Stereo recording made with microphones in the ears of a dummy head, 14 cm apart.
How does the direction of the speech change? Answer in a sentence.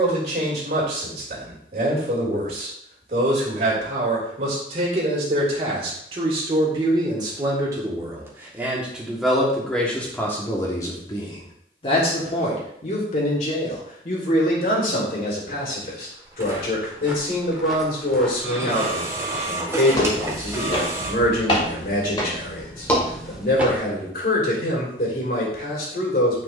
You can hear the speech go from the right side to the left.